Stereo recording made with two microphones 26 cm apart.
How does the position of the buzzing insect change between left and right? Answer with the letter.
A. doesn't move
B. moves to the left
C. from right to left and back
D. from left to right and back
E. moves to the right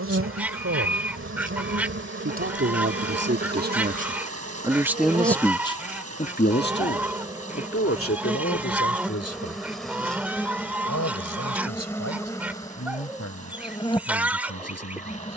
B.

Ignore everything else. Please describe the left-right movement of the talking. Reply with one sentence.
In this clip you hear the talking go from the right side to the left.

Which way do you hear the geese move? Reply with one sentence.
You can hear the geese stay in one place.